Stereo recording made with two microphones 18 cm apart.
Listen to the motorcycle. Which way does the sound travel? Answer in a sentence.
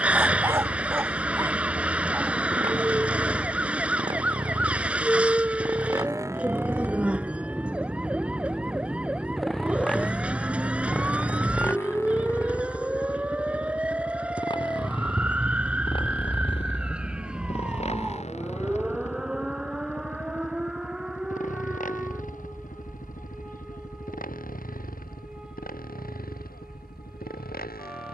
In this clip you hear the motorcycle move from right to left.